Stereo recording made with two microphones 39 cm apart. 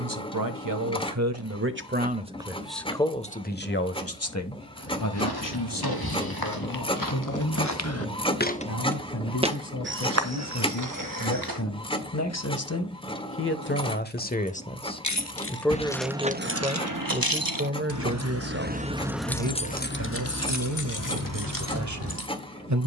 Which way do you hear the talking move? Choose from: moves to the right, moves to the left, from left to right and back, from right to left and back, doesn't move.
from right to left and back.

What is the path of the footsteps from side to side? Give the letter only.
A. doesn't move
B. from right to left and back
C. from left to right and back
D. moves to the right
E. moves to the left
D.